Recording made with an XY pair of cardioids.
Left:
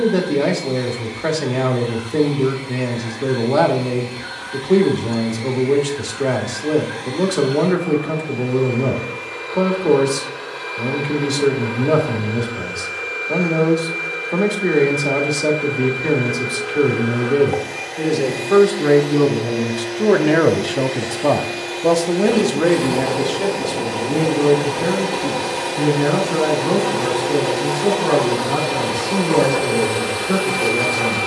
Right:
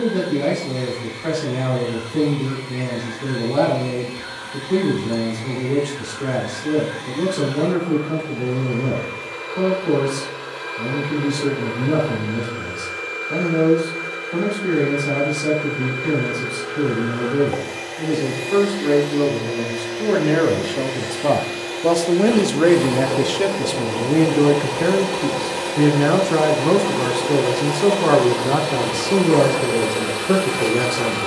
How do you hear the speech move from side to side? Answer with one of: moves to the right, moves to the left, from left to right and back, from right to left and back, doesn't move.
moves to the right.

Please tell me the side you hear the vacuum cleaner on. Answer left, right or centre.
centre.